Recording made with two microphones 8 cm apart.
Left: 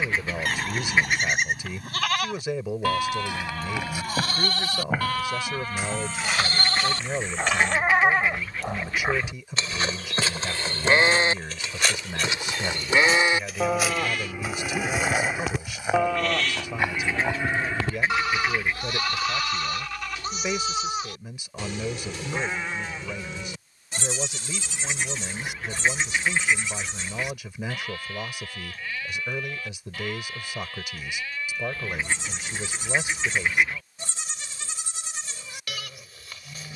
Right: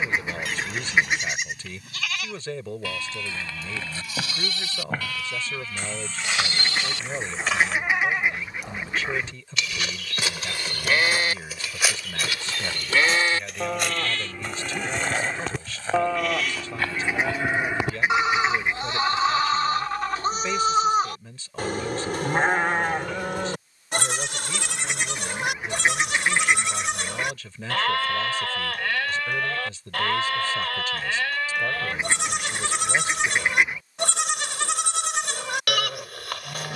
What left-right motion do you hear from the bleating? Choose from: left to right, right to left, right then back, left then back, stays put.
left to right.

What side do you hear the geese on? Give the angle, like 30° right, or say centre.
20° right.